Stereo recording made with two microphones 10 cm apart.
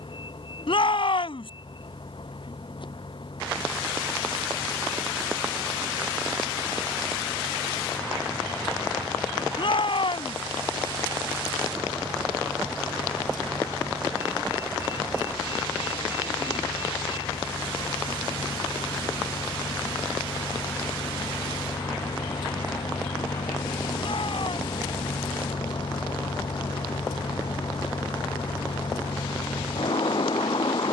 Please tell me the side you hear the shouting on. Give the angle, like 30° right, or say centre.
60° left.